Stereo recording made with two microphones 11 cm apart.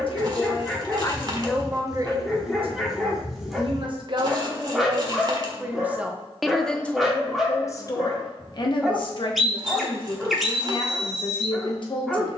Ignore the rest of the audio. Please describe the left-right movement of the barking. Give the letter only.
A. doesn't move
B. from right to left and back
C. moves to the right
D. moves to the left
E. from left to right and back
A.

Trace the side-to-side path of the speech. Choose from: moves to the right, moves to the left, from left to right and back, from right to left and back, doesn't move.
from left to right and back.